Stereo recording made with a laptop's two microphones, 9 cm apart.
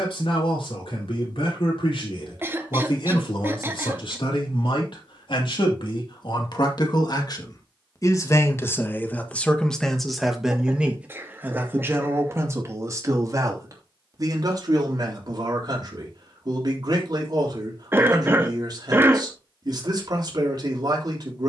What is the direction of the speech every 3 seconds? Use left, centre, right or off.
left, left, left, centre, right, right, right.